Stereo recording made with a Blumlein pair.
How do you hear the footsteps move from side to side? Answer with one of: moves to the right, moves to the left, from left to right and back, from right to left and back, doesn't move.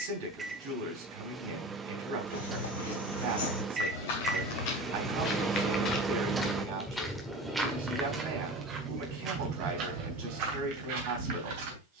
moves to the right.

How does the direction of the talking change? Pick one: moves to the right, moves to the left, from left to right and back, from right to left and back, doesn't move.
doesn't move.